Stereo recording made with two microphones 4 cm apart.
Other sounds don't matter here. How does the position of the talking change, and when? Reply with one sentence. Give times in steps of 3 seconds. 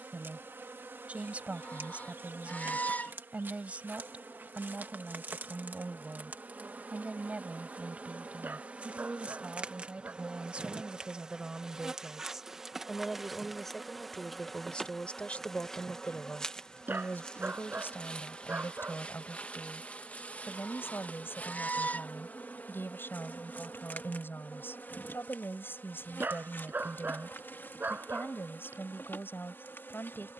You can hear the talking on the right from 0 s, in the centre from 12 s and on the left from 15 s.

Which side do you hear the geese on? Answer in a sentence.
In this clip you hear the geese on the left.